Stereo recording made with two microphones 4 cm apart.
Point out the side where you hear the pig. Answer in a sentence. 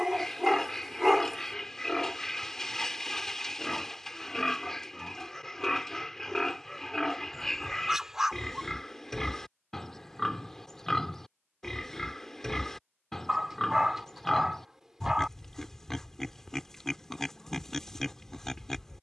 In this clip you hear the pig in the centre.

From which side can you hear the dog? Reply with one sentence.
You can hear the dog in the centre.